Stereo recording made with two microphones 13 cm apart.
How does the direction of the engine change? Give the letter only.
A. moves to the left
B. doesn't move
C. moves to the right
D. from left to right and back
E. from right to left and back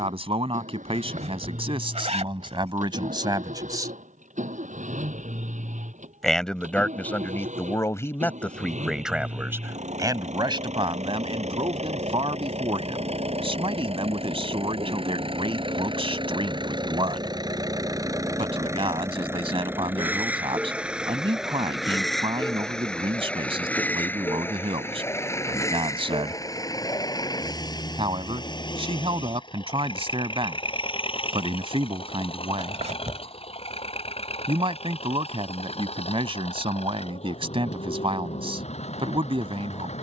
A.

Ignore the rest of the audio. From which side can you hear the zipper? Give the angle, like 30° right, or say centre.
60° right.